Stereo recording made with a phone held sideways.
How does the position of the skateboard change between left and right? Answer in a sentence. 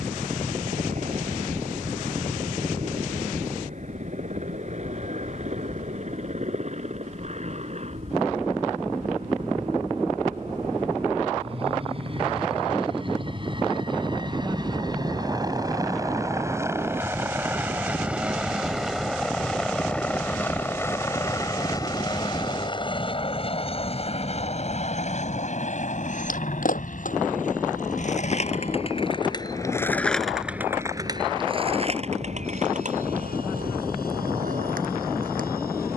You can hear the skateboard move from left to right.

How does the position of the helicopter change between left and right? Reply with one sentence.
You can hear the helicopter move to the left.